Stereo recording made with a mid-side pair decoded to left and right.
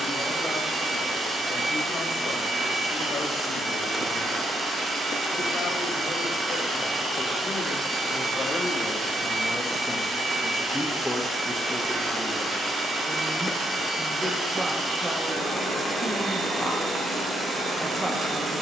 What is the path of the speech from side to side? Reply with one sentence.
In this clip you hear the speech go from the left side to the right.